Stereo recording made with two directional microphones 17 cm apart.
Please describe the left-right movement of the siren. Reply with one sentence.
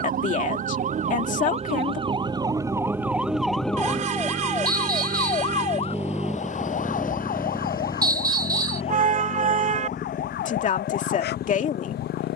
In this clip you hear the siren move from right to left.